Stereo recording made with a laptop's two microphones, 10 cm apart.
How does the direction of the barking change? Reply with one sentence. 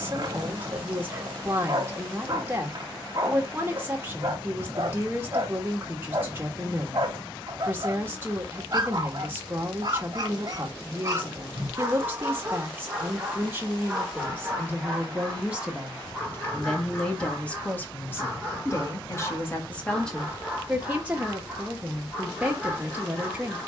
In this clip you hear the barking travel towards the left.